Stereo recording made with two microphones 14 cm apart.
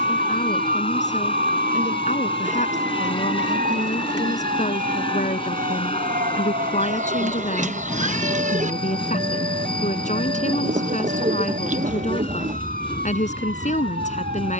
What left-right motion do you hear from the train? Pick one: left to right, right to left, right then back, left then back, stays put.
stays put.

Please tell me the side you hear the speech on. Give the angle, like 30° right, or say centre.
60° left.